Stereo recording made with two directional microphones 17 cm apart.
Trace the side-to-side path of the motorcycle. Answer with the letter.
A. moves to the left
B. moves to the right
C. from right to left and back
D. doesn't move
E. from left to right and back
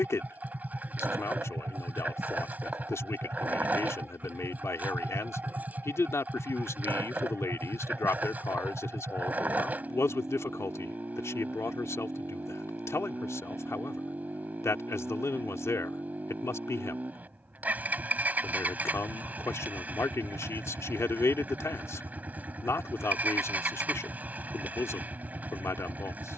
D.